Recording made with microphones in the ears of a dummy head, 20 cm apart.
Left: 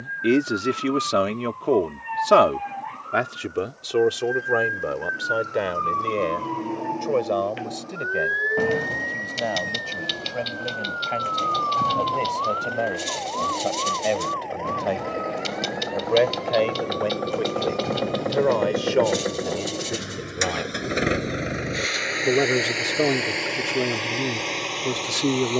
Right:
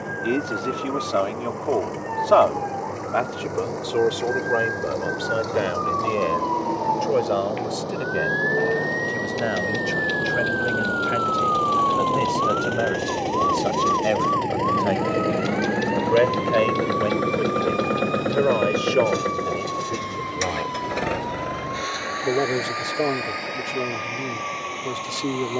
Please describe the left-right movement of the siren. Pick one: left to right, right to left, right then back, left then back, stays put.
left to right.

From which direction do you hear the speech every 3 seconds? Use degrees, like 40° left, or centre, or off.
30° left, 10° left, 10° right, 20° right, 10° right, 10° right, centre, 20° left, 20° left.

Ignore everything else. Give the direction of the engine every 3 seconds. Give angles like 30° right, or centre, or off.
80° right, 80° right, 70° right, 70° right, 60° right, 30° right, centre, 40° left, 50° left.